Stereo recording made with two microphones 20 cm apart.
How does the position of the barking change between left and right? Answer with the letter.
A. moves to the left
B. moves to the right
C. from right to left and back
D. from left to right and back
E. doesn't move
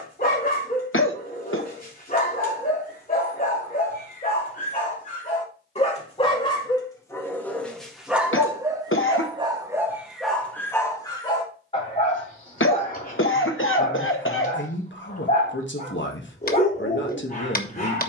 D.